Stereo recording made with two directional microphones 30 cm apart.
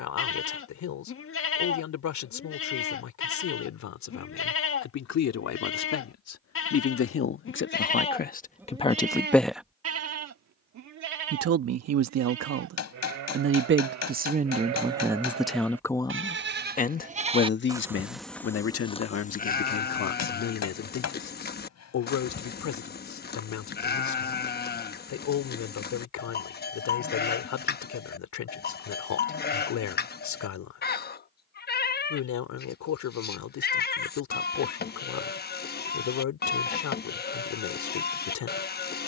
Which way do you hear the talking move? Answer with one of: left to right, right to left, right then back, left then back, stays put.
right then back.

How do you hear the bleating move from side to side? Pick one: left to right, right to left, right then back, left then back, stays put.
right then back.